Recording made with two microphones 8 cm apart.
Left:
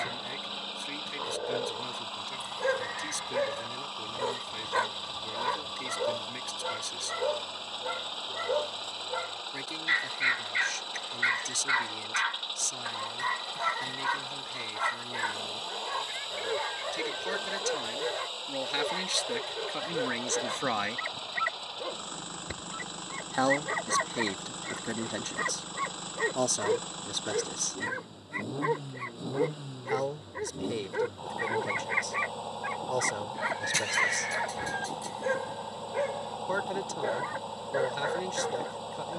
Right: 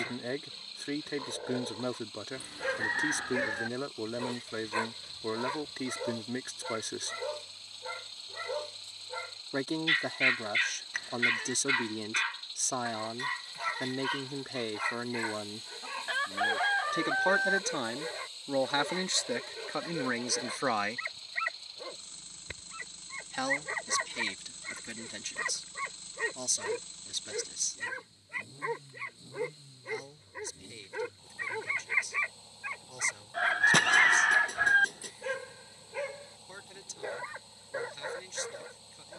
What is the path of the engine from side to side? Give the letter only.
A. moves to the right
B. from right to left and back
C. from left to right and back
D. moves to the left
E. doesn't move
E.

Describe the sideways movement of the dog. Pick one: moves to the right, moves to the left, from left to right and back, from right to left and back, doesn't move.
doesn't move.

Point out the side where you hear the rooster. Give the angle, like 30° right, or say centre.
60° right.